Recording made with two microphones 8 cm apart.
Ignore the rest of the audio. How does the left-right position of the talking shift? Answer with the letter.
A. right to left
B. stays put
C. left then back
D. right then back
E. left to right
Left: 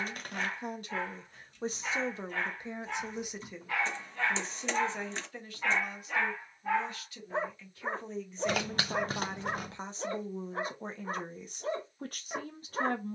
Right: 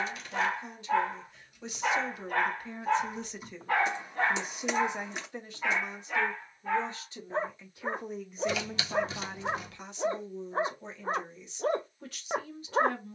D.